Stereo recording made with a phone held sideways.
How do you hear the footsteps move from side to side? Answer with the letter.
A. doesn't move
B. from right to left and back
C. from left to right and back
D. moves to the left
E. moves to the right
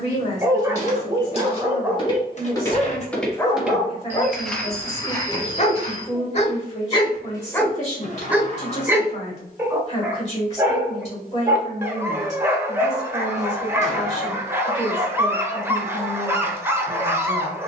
C.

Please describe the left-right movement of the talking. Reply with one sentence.
You can hear the talking stay in one place.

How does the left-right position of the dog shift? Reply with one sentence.
You can hear the dog go left and come back.